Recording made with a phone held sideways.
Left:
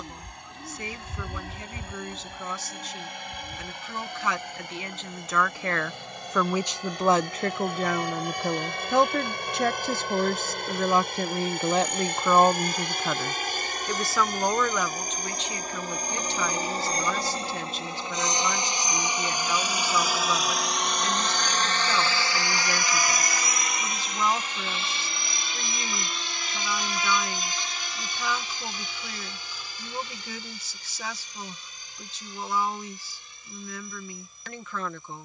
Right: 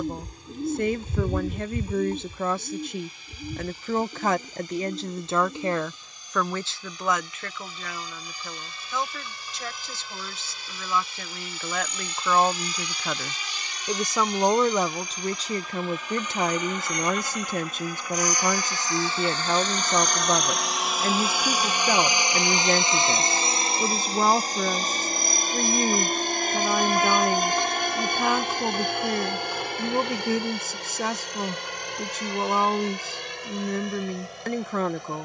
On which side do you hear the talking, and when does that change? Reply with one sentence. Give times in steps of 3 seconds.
You can hear the talking on the right from 0 s, on the left from 6 s, in the centre from 12 s and on the right from 15 s.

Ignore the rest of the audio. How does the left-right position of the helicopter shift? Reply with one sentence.
You can hear the helicopter move from left to right.